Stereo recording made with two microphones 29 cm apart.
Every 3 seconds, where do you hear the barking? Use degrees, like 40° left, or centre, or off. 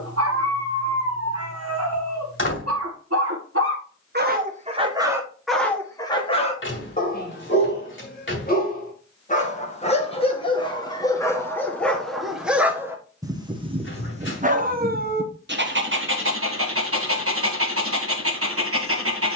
60° right, 20° right, 30° left, 20° left, 20° right, 50° right, 50° right.